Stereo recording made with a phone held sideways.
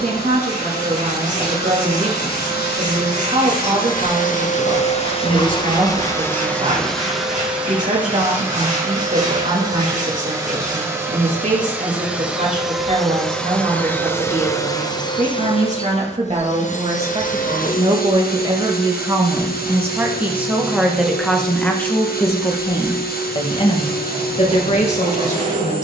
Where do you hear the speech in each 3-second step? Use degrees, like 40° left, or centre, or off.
50° right, 50° right, 50° right, 50° right, 50° right, 40° right, 20° right, 20° left, 40° left.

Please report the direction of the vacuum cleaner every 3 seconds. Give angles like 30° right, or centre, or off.
80° left, 50° left, centre, 20° right, 10° left, 50° left, 70° left, 70° left, 70° left.